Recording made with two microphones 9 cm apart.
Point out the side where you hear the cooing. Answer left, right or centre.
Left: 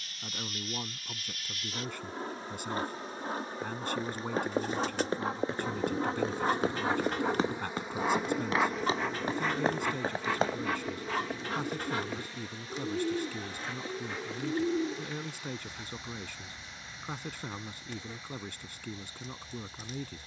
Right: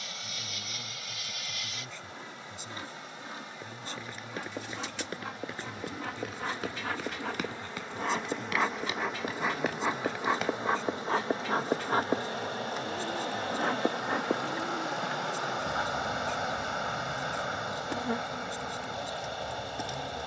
left.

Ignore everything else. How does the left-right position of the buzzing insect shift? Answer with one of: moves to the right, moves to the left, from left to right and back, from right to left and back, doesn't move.
moves to the right.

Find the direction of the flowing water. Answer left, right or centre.
right.